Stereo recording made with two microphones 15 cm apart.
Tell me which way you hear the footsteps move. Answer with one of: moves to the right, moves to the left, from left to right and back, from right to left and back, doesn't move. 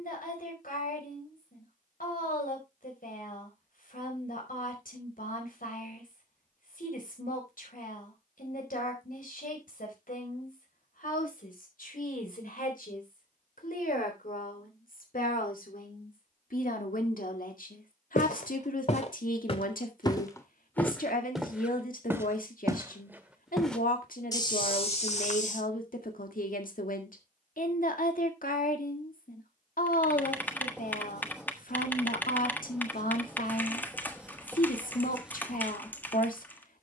from left to right and back.